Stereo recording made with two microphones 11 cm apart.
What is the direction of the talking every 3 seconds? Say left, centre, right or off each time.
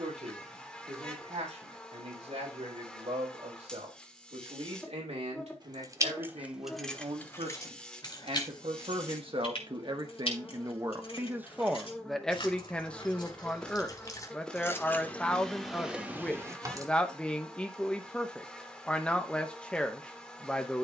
right, right, right, right, centre, centre, centre.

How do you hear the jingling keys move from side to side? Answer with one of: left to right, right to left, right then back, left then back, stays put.
left then back.